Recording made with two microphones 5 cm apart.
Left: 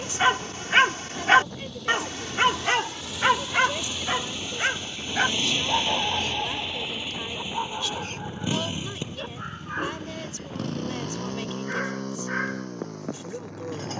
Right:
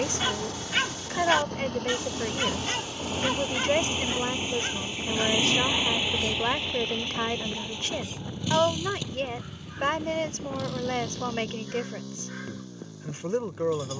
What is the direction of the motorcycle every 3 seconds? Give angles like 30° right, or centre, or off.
50° right, 30° right, 10° left, 40° left, 60° left.